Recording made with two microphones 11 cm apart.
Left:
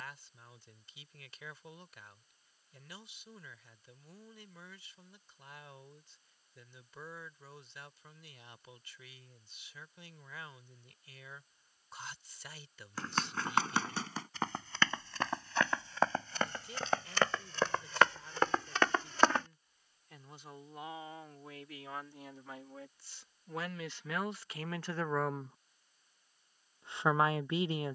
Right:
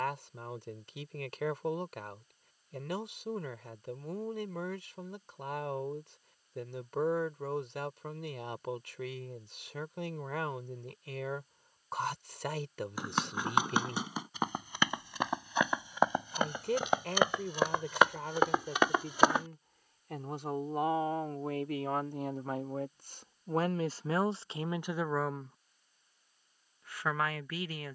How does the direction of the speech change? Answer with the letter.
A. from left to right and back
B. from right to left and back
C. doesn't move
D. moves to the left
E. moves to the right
D.